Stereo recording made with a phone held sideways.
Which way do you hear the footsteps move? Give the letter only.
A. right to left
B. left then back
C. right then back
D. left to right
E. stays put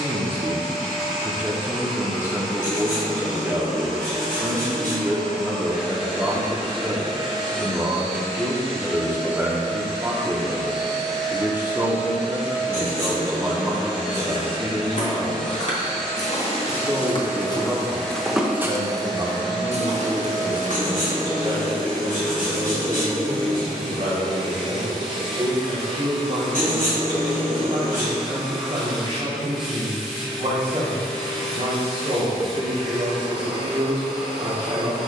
D.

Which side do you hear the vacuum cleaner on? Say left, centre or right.
centre.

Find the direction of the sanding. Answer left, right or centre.
left.